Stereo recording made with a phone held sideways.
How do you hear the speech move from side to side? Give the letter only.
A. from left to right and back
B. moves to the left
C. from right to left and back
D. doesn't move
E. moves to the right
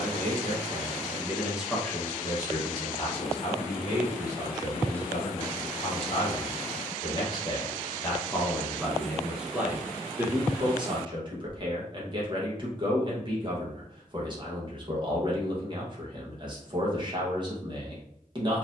C.